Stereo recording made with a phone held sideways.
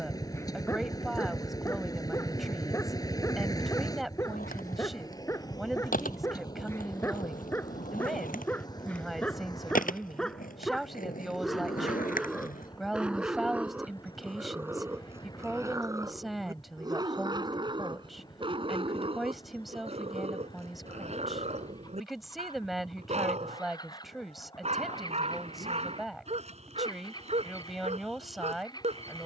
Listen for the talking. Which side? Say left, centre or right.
centre.